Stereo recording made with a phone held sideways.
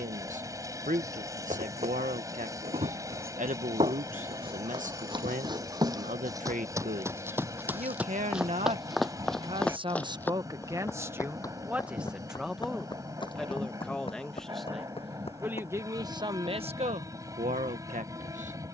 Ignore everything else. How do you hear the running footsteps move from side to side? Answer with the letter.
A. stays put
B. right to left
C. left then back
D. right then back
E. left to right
B.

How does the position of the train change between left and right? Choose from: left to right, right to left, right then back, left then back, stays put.
stays put.